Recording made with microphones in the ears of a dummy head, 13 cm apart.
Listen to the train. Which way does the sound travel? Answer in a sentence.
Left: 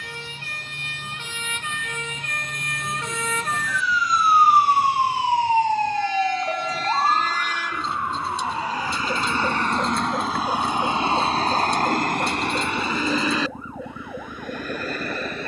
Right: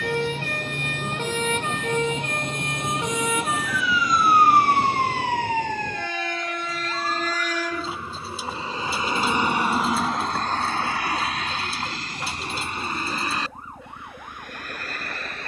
In this clip you hear the train move from right to left.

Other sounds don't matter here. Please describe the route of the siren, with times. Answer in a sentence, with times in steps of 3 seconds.
In this clip you hear the siren on the right from 0 s, in the centre from 3 s and on the left from 6 s.